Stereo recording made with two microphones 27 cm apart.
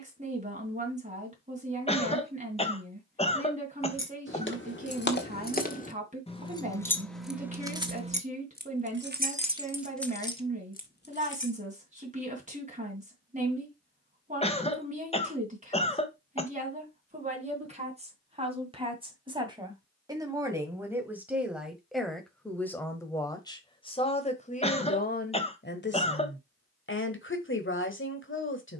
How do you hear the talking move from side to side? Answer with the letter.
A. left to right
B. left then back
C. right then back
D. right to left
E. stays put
D.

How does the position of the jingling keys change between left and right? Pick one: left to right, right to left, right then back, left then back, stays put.
right then back.